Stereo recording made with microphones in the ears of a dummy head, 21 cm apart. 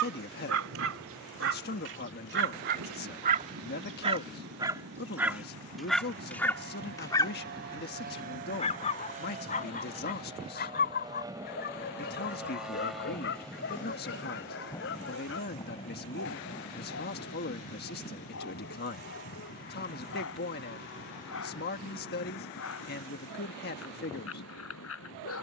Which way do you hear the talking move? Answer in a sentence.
In this clip you hear the talking stay put.